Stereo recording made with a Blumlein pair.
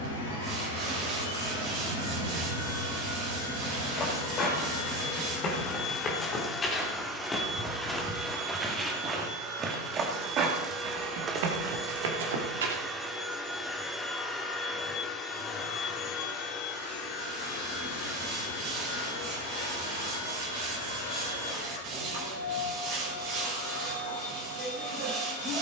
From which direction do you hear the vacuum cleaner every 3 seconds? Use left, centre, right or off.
left, left, centre, right, centre, left, left, left, left.